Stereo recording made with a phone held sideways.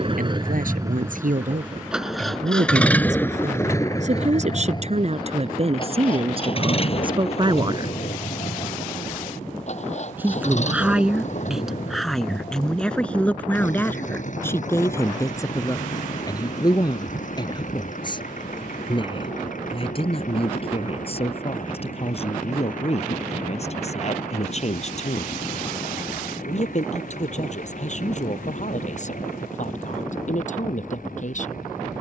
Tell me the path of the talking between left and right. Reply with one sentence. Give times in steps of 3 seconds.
In this clip you hear the talking on the right from 0 s, in the centre from 9 s and on the left from 15 s.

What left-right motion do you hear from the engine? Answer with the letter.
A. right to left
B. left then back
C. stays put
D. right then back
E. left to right
A.